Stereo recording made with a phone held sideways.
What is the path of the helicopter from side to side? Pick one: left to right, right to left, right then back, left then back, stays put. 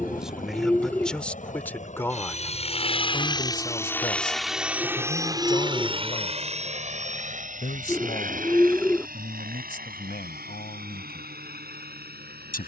left to right.